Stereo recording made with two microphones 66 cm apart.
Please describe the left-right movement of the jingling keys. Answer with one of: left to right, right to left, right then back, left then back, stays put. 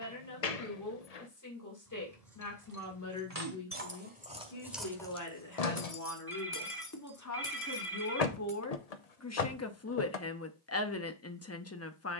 right to left.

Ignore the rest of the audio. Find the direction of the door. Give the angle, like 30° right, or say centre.
70° left.